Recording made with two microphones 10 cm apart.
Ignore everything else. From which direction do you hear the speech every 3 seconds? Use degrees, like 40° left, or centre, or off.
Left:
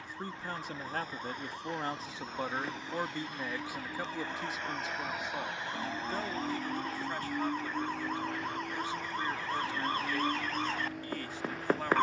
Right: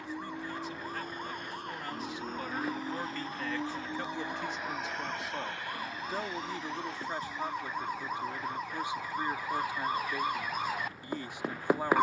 40° left, 10° left, 20° right, 20° right.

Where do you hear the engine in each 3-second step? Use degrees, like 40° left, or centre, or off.
60° right, 10° right, 50° left, 70° left.